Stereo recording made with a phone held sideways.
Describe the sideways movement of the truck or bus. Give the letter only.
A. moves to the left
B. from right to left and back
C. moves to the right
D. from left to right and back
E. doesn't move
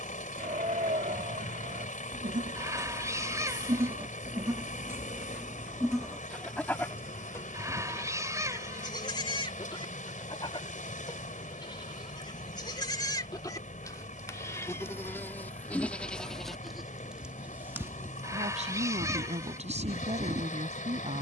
E.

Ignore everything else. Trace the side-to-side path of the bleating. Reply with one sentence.
You can hear the bleating move from right to left and back again.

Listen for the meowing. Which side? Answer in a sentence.
You can hear the meowing on the right.